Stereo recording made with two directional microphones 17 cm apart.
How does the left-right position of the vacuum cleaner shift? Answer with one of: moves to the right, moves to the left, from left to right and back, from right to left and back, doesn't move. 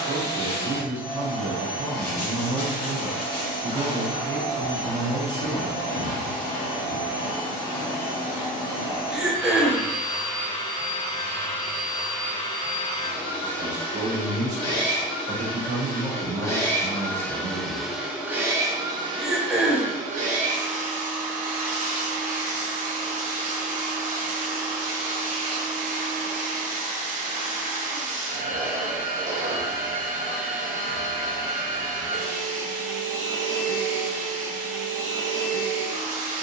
moves to the right.